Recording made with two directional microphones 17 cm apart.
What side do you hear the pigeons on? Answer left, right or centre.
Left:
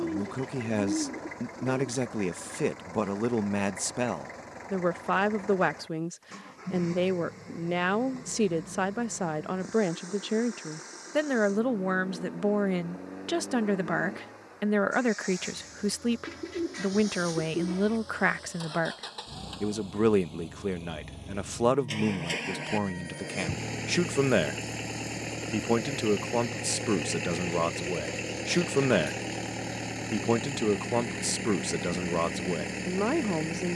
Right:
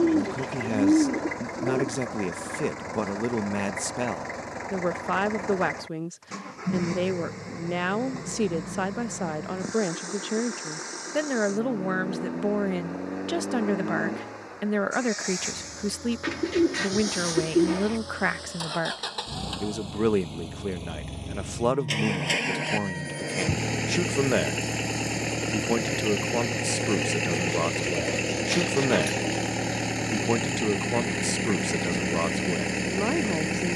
right.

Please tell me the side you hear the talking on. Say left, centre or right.
centre.